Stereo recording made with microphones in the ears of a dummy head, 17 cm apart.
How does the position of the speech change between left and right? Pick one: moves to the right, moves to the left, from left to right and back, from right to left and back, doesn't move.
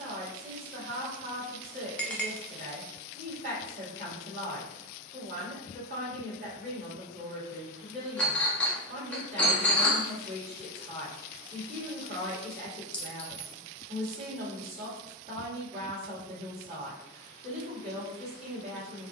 doesn't move.